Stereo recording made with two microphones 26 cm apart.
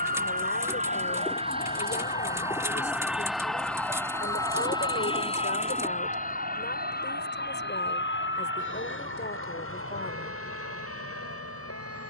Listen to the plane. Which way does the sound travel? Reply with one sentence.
You can hear the plane move to the left.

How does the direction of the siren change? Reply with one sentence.
You can hear the siren go from the left side to the right.